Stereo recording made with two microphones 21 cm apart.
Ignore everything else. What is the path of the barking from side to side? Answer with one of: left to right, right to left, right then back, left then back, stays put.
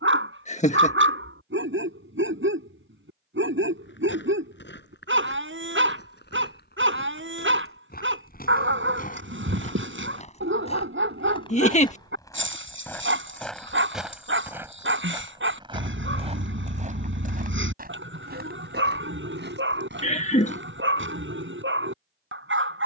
stays put.